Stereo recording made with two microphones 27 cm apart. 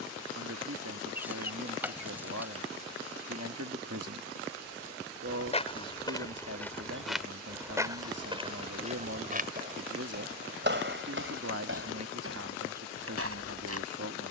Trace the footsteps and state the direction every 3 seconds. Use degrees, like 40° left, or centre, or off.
off, 20° left, 10° right, 40° right, 60° right.